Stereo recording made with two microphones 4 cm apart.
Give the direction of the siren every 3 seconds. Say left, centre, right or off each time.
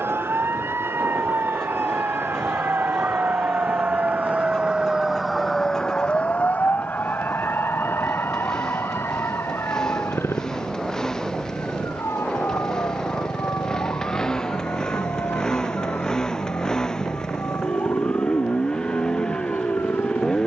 right, right, left, left, left, left, left.